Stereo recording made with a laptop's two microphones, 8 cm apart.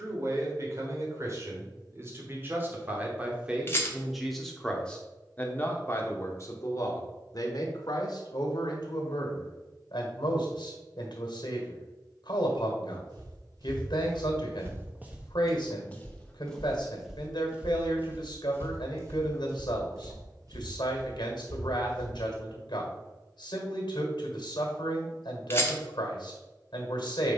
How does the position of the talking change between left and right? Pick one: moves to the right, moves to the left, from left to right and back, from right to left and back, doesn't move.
moves to the left.